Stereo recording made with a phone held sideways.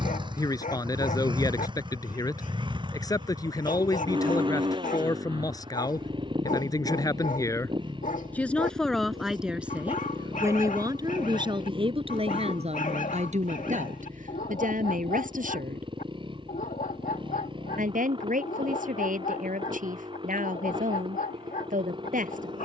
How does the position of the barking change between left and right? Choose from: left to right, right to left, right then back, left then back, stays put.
stays put.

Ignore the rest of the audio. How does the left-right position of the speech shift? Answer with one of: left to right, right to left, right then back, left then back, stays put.
left to right.